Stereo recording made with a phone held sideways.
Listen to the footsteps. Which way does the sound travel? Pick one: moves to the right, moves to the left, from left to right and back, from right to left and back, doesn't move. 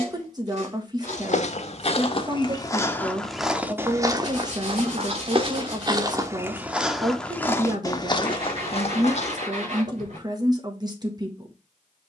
from left to right and back.